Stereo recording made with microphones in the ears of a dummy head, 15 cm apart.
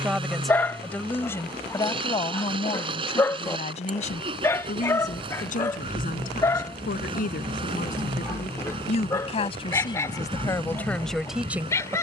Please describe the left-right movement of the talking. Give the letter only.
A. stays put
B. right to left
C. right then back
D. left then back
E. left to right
D.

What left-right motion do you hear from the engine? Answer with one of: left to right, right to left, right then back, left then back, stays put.
stays put.